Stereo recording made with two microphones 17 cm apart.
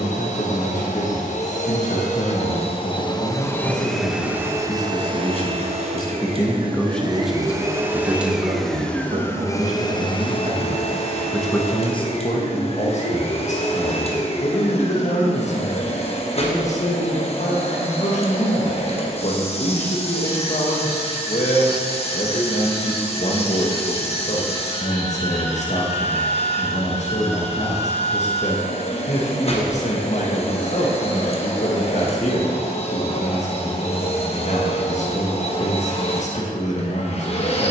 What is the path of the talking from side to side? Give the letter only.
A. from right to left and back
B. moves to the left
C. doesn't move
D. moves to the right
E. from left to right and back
E.